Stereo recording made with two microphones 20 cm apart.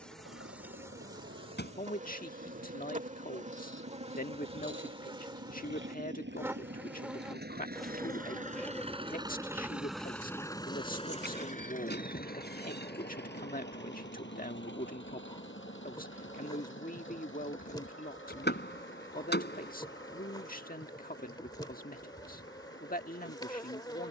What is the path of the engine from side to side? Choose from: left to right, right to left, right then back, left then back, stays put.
right to left.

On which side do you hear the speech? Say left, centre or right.
left.